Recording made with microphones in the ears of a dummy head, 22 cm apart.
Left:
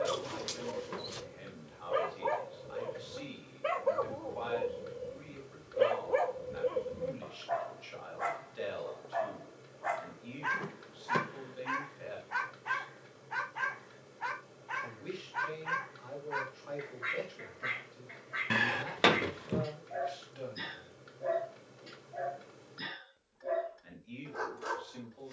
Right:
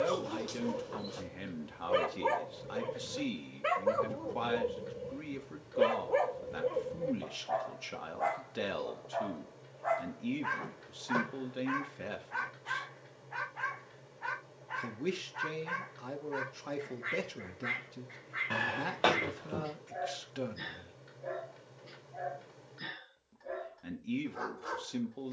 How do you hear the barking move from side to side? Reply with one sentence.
You can hear the barking travel towards the left.